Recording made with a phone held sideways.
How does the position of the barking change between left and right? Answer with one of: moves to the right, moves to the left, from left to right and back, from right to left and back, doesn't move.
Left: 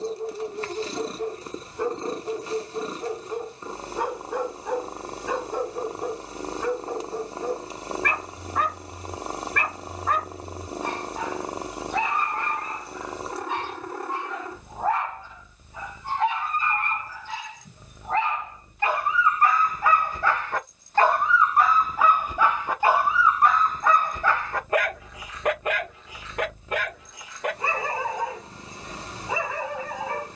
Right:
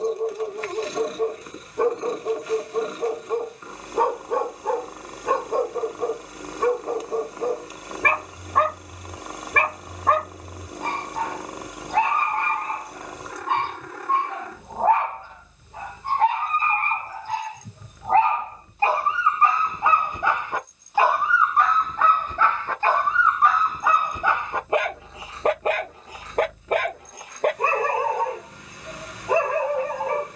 from right to left and back.